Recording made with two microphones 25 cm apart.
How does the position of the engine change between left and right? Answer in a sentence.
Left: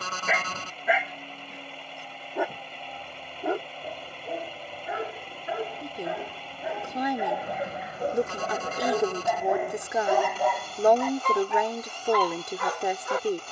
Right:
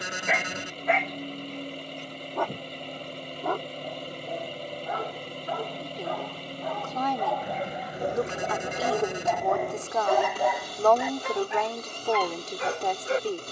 In this clip you hear the engine stay put.